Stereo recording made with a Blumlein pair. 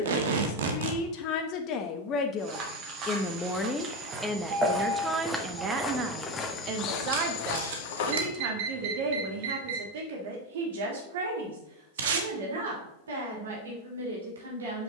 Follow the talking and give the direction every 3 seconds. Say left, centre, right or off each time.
left, centre, right, right, right.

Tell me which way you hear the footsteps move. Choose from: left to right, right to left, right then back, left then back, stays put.
right to left.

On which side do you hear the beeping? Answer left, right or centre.
right.